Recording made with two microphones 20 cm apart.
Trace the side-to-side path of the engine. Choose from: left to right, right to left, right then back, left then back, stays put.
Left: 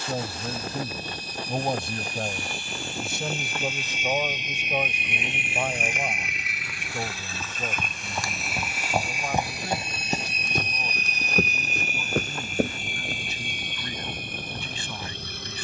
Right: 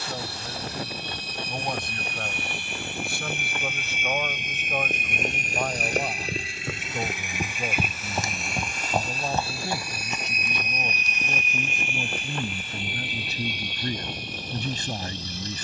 right to left.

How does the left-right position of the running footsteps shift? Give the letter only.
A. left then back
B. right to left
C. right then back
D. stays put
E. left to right
B.